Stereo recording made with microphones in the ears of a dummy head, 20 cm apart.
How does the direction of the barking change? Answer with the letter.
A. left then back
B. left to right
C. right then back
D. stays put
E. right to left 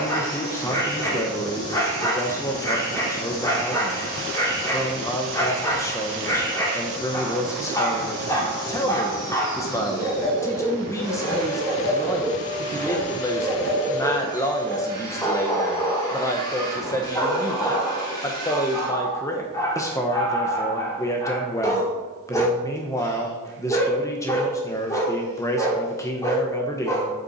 D.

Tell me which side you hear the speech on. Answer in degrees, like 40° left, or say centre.
10° left.